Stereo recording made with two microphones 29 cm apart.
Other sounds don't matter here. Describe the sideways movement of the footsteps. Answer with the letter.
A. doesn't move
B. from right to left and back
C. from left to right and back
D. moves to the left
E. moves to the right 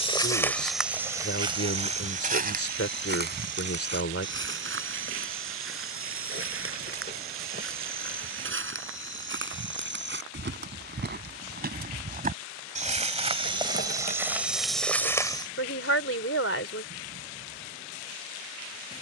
C.